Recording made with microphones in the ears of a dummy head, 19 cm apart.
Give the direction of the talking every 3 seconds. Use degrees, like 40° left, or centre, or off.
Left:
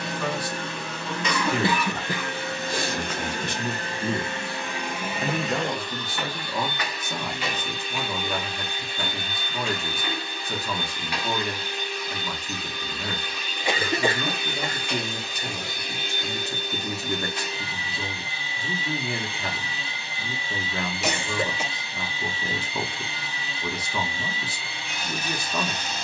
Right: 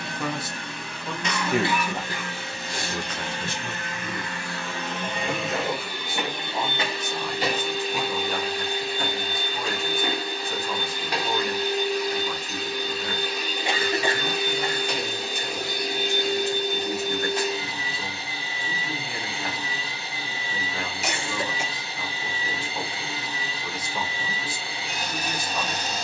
20° right, 30° left, 70° left, 70° left, 70° left, 70° left, 70° left, 70° left, 70° left.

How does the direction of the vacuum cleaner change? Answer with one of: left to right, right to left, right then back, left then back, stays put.
left to right.